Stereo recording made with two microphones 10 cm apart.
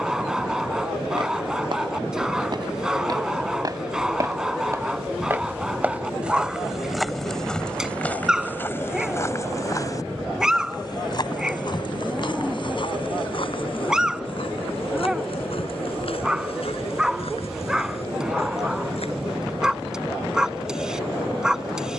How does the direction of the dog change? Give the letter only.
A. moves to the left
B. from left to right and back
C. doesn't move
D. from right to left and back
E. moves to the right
C.